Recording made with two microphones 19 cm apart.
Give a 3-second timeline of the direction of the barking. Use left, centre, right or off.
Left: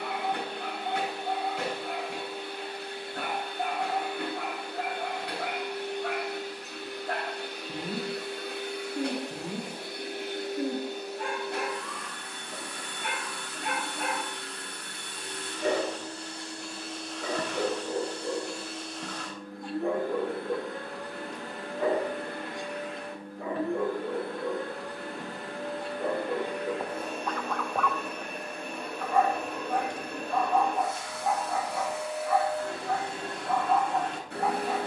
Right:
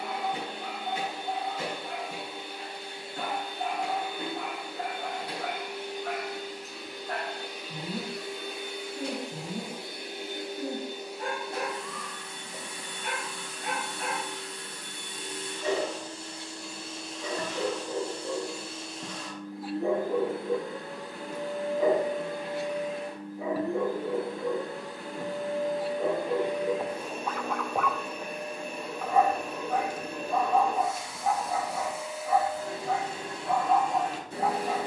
left, left, left, left, left, left, centre, centre, centre, centre, centre, centre.